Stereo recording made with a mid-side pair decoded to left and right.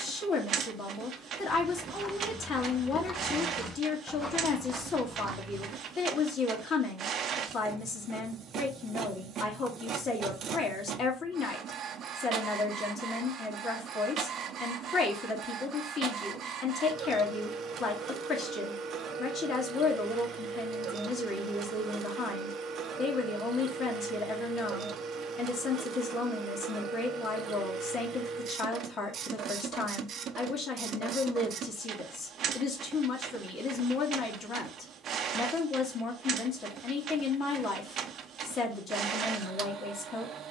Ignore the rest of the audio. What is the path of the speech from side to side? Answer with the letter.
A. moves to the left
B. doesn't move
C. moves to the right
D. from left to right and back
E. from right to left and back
B.